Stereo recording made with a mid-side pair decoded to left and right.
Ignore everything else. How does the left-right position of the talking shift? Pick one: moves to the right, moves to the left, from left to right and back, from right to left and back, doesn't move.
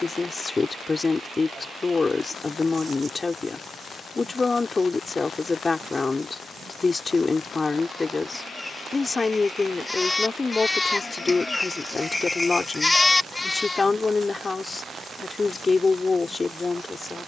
doesn't move.